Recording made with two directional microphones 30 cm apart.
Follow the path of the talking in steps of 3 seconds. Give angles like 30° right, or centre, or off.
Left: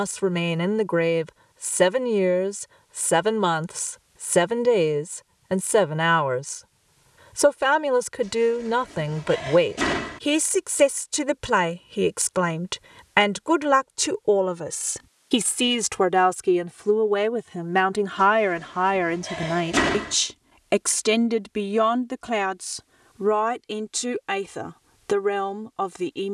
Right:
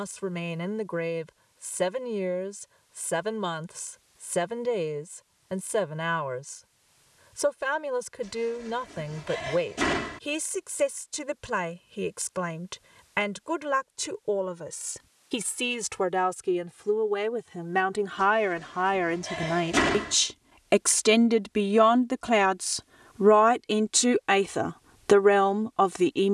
60° left, 60° left, 60° left, 60° left, 60° left, 40° left, 20° left, 20° right, 30° right.